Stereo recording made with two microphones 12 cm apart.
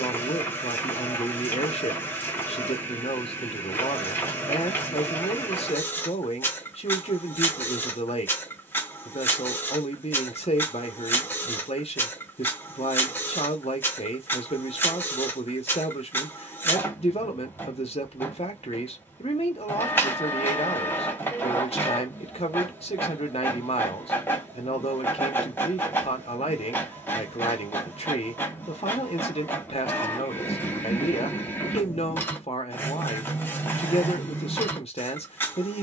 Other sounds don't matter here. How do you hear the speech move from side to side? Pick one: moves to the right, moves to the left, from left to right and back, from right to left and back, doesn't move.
doesn't move.